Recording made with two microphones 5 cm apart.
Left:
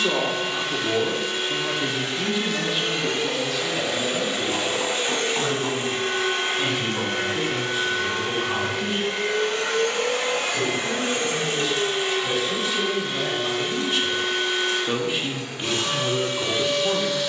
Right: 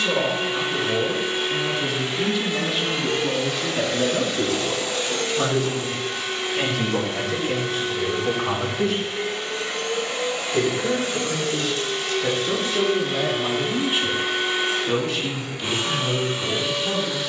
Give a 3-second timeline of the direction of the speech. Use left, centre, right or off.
left, right, right, right, right, left.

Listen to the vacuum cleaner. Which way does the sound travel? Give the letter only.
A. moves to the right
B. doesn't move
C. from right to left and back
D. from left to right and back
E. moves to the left
C.